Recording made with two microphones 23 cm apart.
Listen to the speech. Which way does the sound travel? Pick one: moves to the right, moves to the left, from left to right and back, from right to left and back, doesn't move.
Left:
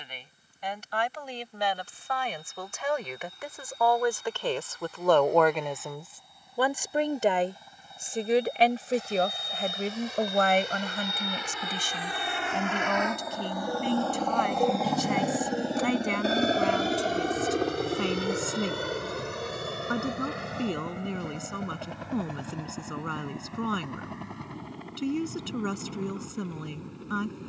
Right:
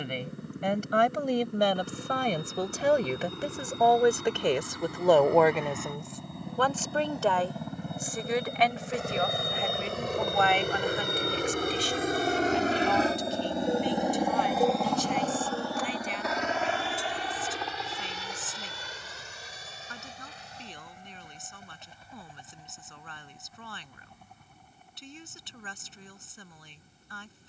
moves to the left.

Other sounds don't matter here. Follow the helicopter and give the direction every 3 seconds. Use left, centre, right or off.
right, right, right, right, right, left, left, left, left.